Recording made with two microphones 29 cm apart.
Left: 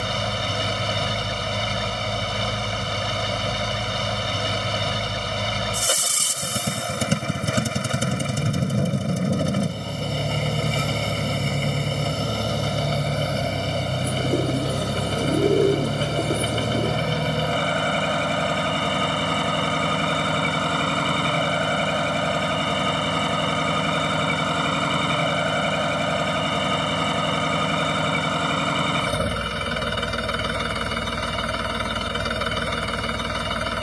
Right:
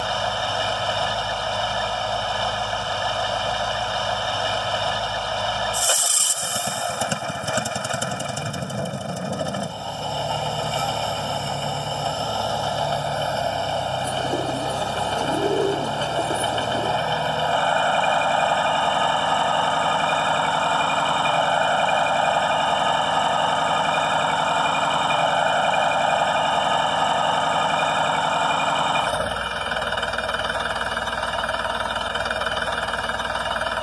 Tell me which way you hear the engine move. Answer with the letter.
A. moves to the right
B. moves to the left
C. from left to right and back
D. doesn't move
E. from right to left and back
D.